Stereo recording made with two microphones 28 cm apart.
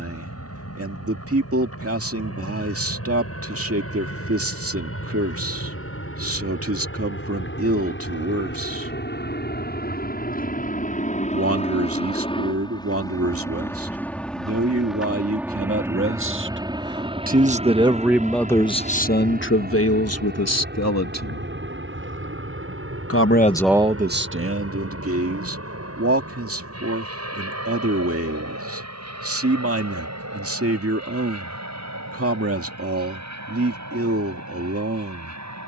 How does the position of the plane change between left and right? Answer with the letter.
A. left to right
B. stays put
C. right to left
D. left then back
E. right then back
A.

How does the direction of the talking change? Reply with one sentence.
You can hear the talking go left and come back.